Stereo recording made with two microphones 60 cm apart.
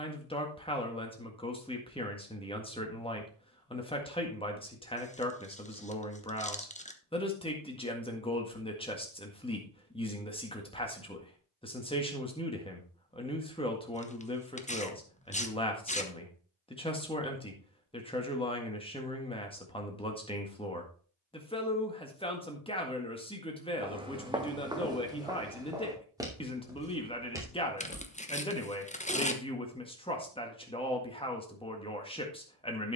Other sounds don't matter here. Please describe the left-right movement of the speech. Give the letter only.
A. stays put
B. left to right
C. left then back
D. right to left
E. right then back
A.